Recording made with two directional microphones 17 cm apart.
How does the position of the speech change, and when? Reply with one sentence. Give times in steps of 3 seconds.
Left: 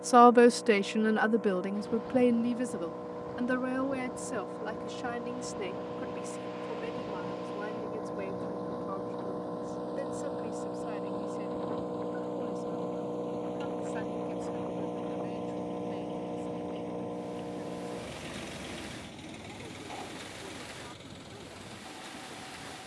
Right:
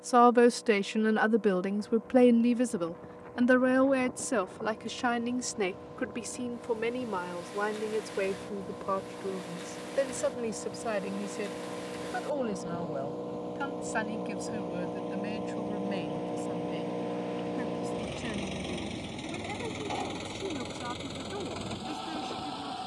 You can hear the speech in the centre from 0 s and on the right from 3 s.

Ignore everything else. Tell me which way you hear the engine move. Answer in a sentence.
In this clip you hear the engine go from the left side to the right.